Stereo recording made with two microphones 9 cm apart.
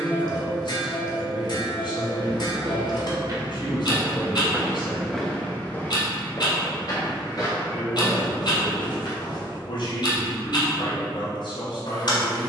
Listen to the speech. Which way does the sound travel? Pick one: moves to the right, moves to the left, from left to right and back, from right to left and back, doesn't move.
doesn't move.